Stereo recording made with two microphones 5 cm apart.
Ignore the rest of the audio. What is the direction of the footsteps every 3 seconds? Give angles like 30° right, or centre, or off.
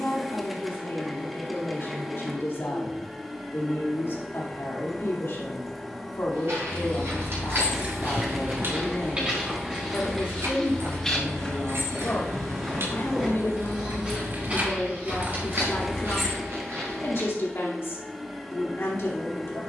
off, off, 50° right, centre, 10° right, 50° right, off.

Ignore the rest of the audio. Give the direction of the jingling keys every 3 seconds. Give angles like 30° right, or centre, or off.
off, off, 20° right, 70° right, 60° right, 10° right, off.